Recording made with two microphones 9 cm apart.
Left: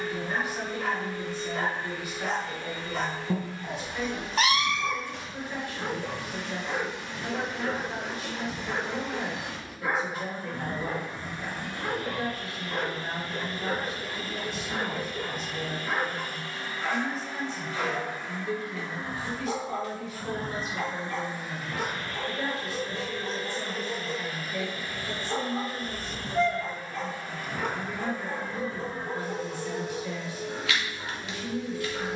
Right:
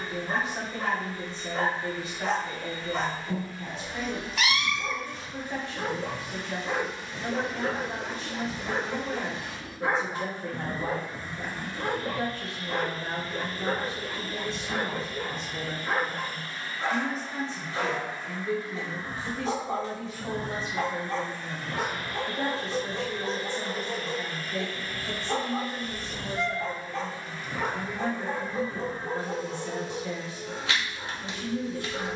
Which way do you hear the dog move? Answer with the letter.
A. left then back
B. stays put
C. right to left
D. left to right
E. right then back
B.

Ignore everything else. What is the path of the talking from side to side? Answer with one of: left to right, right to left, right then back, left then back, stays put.
stays put.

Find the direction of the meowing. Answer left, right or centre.
left.